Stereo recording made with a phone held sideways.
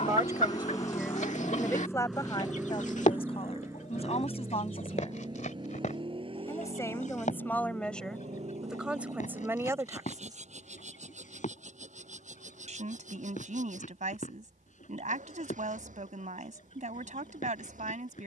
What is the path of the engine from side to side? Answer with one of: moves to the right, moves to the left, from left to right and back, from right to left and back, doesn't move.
moves to the right.